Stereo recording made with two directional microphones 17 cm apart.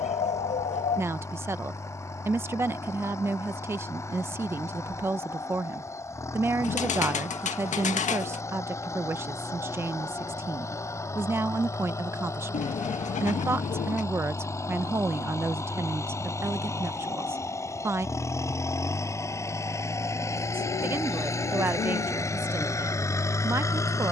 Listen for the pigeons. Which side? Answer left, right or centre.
left.